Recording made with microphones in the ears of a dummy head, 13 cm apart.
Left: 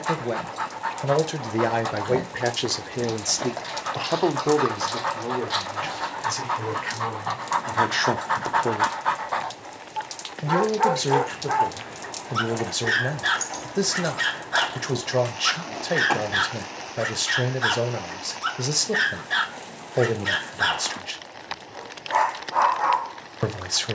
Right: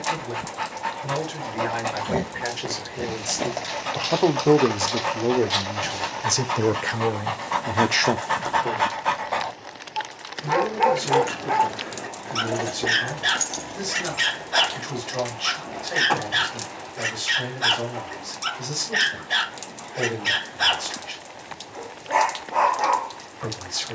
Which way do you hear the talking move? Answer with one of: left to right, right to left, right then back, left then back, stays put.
right then back.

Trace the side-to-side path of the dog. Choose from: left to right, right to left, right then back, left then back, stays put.
stays put.